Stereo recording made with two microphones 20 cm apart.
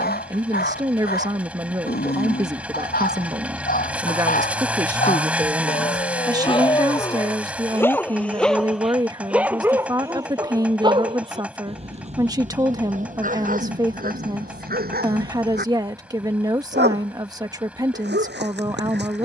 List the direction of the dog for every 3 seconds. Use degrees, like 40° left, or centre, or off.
50° left, 40° left, 10° left, 20° right, 40° right, 60° right, 60° right.